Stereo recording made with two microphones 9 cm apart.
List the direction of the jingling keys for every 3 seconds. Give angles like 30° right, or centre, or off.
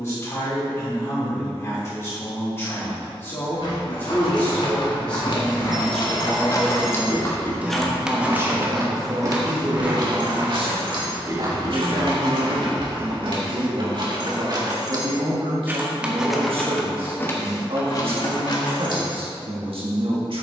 off, 60° left, 10° left, 50° right, 50° right, 10° left, 50° left.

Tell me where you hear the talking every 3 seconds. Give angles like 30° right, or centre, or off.
30° left, 20° left, 10° right, 50° right, 70° right, 70° right, 70° right.